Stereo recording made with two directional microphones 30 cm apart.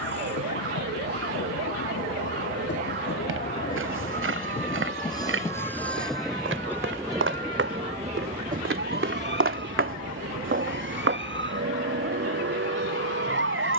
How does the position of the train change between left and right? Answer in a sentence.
In this clip you hear the train move from left to right.